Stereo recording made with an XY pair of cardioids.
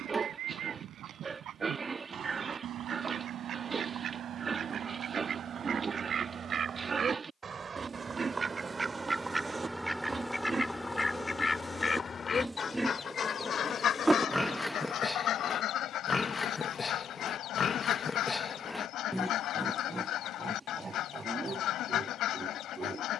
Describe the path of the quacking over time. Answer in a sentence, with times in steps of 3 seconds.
You can hear the quacking on the right from 0 s, in the centre from 9 s and on the left from 12 s.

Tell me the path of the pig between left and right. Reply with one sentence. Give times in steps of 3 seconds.
You can hear the pig on the right from 0 s, in the centre from 12 s, on the left from 15 s, in the centre from 18 s and on the right from 21 s.